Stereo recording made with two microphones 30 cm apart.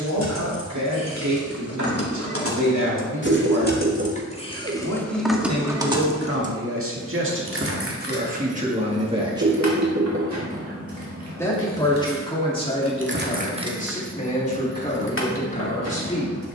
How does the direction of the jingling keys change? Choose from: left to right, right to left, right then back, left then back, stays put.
right then back.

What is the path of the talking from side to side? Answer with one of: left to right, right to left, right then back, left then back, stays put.
right to left.